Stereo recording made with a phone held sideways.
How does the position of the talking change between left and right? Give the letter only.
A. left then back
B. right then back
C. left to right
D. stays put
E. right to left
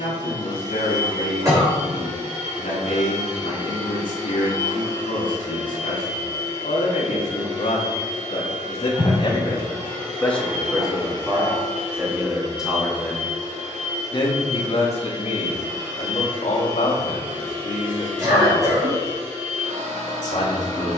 B.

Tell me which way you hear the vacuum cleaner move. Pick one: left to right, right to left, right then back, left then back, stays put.
stays put.